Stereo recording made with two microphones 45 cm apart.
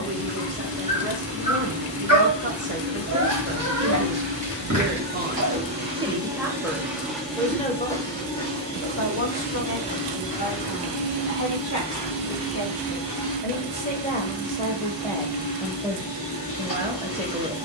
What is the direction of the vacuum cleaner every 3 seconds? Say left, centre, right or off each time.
right, right, centre, left, left, left.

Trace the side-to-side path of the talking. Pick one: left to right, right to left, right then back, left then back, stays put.
left then back.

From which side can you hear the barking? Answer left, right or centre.
right.